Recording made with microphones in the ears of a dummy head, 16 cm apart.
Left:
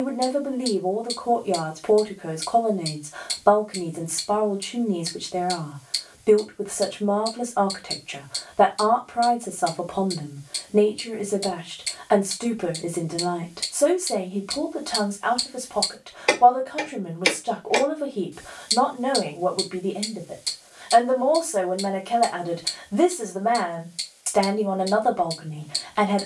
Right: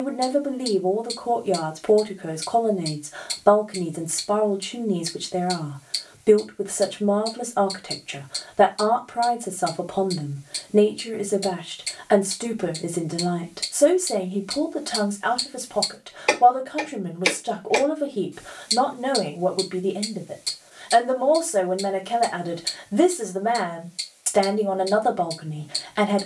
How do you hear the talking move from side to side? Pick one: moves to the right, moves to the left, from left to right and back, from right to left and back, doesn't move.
doesn't move.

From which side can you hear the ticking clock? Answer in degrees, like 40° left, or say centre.
centre.